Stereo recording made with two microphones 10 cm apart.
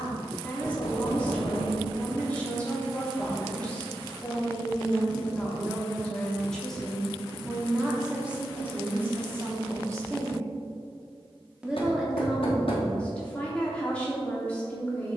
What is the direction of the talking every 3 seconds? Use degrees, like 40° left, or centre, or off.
10° left, 10° left, centre, 20° right, 10° left.